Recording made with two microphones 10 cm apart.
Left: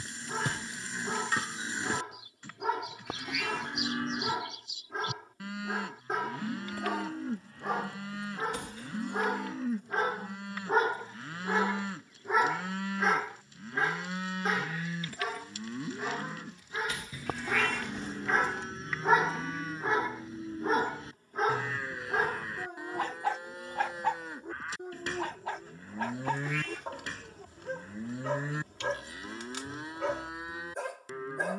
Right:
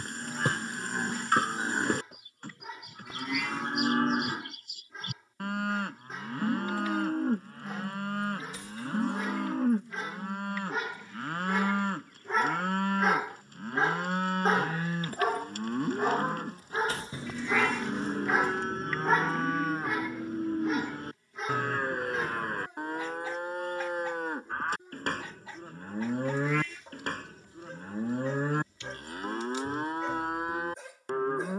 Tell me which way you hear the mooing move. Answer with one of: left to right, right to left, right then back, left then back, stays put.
stays put.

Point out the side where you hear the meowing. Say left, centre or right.
left.